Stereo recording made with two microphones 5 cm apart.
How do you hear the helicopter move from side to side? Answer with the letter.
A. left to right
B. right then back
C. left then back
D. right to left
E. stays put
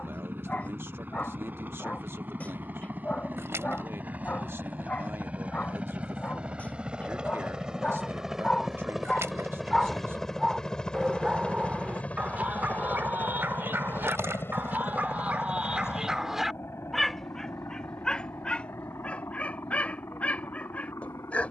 D.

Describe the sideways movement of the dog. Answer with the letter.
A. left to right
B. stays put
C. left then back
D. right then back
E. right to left
D.